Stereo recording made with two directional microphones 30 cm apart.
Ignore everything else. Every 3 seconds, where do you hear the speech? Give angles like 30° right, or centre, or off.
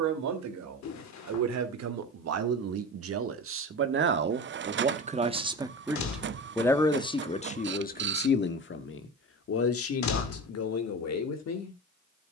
60° right, 30° right, 20° left, 50° left.